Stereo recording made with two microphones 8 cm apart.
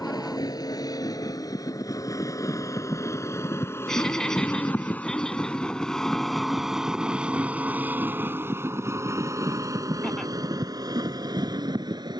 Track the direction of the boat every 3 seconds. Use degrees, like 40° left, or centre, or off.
50° left, 20° left, 20° right, 50° right.